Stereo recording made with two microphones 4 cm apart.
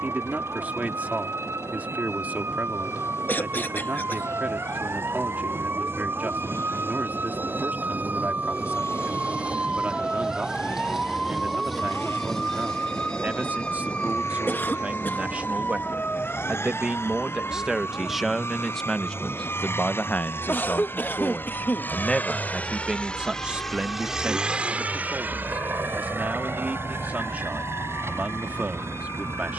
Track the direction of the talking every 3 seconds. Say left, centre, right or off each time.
right, right, right, right, right, right, left, centre, right, right.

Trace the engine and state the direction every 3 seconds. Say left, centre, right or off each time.
left, left, left, left, left, left, left, left, right, right.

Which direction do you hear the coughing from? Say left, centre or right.
left.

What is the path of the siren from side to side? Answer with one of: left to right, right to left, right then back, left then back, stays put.
right to left.